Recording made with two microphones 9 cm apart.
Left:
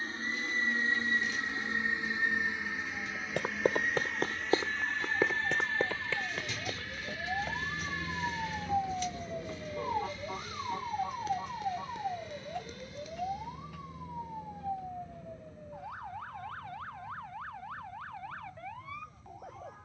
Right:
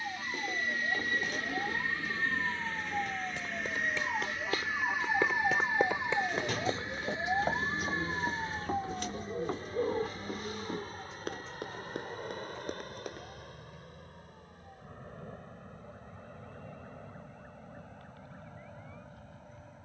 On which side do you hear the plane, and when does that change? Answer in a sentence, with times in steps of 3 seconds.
In this clip you hear the plane on the left from 0 s, in the centre from 3 s and on the right from 6 s.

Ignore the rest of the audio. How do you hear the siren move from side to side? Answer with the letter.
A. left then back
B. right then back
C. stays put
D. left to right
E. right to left
E.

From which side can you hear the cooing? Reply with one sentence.
In this clip you hear the cooing on the right.